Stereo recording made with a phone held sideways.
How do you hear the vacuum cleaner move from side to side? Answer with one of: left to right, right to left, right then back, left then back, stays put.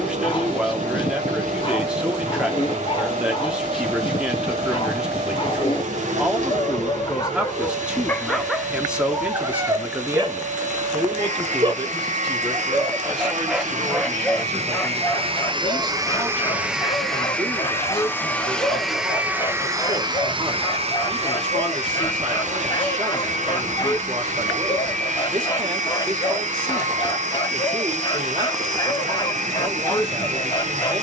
left then back.